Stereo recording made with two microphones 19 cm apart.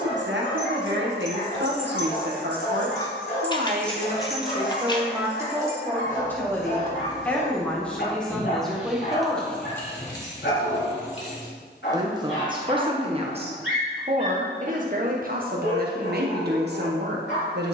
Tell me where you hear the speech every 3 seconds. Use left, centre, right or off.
right, right, centre, centre, right, right.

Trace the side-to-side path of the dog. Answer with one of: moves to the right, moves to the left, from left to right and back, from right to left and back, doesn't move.
doesn't move.